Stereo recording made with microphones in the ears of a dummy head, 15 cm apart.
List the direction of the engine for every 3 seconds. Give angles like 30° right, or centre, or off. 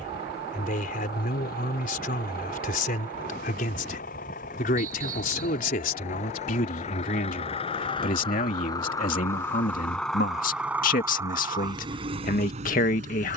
60° left, 50° left, 40° left, centre, 40° right.